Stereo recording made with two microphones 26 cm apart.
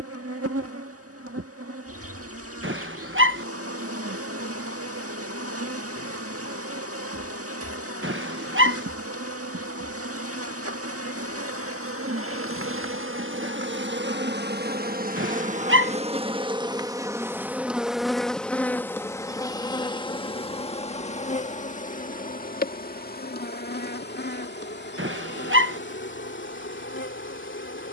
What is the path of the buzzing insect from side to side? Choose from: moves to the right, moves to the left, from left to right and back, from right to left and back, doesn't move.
moves to the left.